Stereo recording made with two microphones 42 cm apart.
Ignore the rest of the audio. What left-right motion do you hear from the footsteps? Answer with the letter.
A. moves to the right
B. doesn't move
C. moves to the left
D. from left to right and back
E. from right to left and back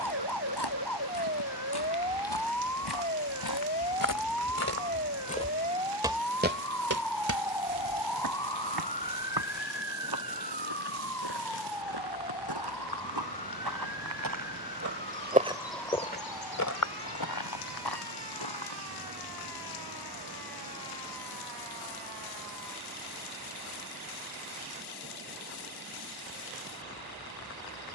D.